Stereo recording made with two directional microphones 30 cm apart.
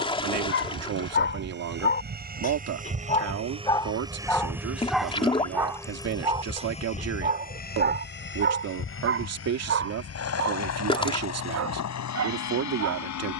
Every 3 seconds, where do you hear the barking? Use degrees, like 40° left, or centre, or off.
40° left, 10° left, 30° right, 50° right, 60° right.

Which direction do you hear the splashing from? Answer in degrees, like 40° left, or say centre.
20° left.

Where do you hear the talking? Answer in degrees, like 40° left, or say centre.
60° right.